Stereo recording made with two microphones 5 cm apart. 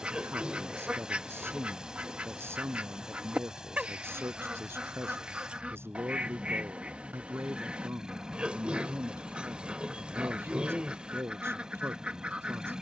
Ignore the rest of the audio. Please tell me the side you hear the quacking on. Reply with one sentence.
In this clip you hear the quacking on the right.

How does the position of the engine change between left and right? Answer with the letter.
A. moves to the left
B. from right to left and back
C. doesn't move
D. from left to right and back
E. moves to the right
C.